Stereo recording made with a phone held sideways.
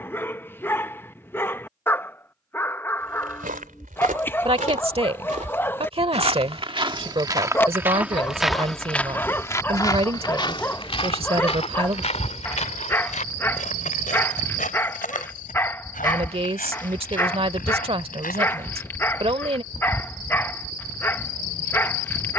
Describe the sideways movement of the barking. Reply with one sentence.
In this clip you hear the barking stay put.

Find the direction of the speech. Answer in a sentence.
You can hear the speech on the right.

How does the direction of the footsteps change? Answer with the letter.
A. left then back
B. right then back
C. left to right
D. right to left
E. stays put
D.